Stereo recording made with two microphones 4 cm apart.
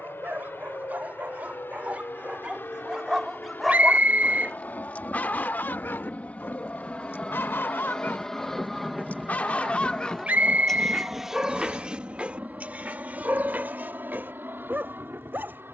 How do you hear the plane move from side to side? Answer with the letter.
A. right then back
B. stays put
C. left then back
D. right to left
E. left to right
E.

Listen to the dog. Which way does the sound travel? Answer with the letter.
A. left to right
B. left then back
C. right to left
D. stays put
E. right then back
B.